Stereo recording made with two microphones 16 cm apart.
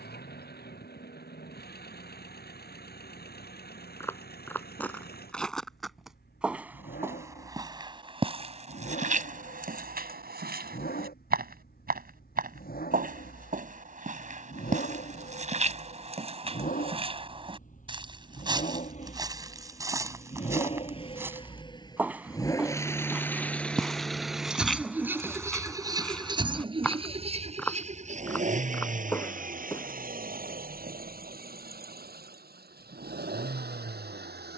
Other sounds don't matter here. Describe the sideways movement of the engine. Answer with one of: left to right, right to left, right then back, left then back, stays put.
left to right.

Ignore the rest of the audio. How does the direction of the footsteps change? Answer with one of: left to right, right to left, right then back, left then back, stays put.
right then back.